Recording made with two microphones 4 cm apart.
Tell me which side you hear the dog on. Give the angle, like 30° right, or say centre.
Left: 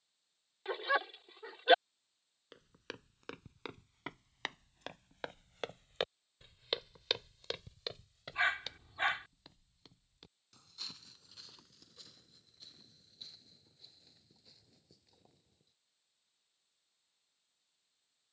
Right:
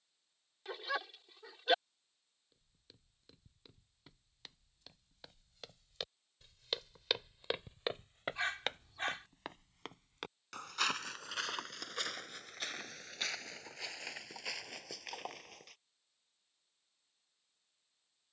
20° left.